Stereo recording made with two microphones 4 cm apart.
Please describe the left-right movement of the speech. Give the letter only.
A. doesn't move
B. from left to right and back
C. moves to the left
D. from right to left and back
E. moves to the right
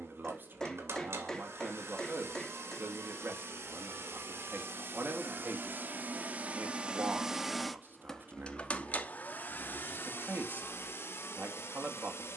A.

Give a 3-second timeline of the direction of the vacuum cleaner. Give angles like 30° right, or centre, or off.
70° right, 60° right, centre, 50° left.